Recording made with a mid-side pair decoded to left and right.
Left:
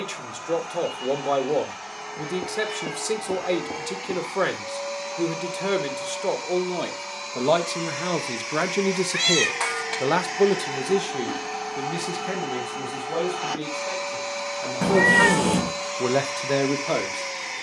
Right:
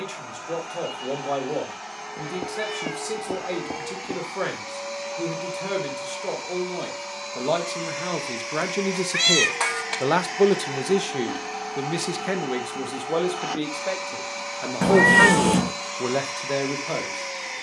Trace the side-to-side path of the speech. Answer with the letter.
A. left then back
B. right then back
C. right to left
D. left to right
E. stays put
B.